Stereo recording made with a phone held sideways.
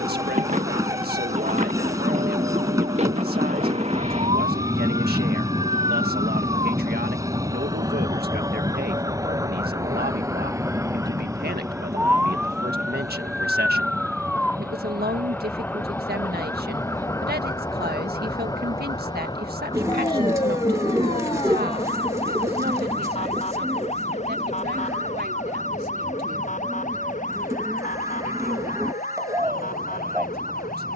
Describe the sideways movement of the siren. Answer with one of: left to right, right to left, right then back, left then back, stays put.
right to left.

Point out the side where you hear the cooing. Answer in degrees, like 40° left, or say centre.
20° right.